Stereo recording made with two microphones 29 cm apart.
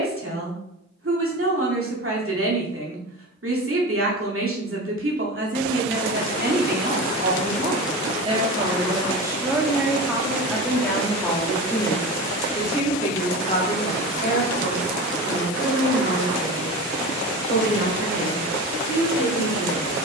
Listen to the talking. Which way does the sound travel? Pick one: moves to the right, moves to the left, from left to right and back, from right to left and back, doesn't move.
moves to the left.